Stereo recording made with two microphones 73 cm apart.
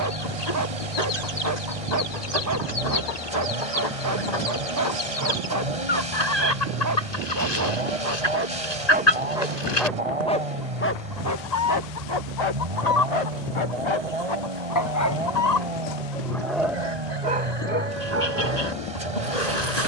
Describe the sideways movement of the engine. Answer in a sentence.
You can hear the engine stay in one place.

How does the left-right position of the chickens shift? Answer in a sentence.
You can hear the chickens stay put.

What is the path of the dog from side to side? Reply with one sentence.
You can hear the dog move from right to left and back again.